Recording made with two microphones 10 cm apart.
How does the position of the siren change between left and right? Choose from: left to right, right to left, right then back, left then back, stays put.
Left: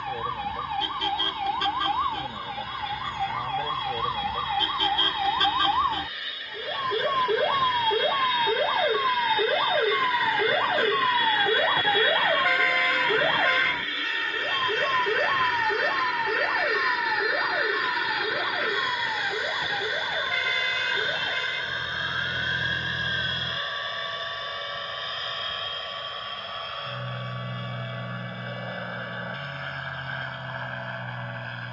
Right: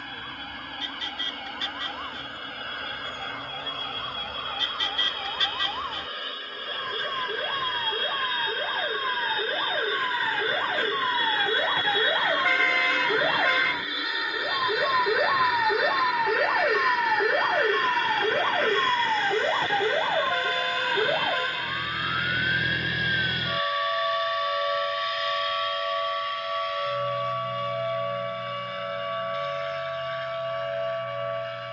left to right.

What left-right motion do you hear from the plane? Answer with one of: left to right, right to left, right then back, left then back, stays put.
right to left.